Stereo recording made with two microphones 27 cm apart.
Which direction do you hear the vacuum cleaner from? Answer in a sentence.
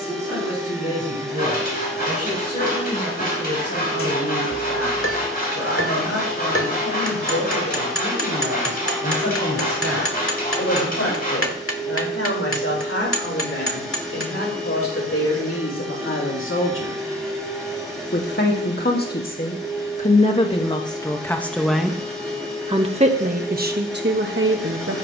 In this clip you hear the vacuum cleaner in the centre.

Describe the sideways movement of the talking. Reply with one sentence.
In this clip you hear the talking move to the right.